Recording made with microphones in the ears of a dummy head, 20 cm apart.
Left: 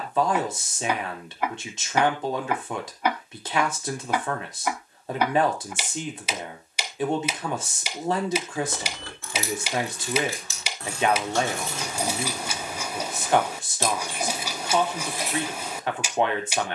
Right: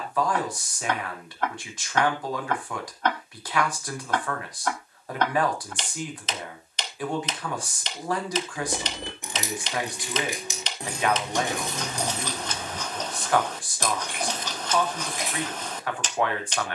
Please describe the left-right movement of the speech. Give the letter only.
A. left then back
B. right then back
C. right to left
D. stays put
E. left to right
D.